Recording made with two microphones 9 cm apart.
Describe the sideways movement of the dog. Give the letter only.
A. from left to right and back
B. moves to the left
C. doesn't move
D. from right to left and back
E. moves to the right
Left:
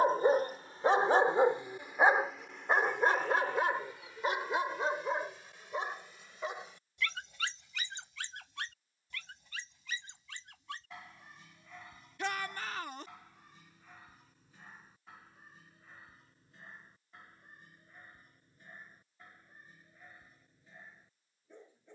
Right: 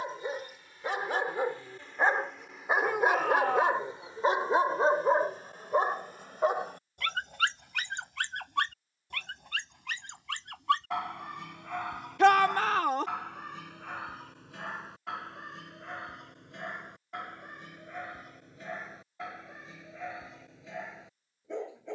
E.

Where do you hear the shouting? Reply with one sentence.
In this clip you hear the shouting on the right.